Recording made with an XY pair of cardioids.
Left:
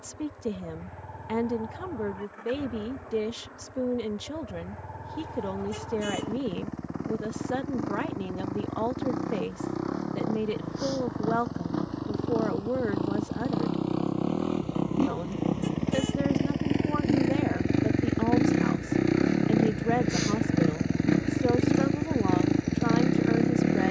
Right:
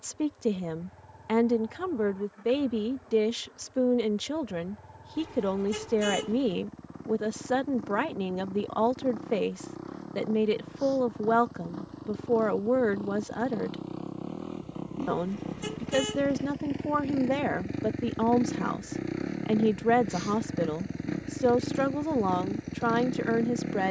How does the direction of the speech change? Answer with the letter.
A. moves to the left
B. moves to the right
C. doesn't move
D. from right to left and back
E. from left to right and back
C.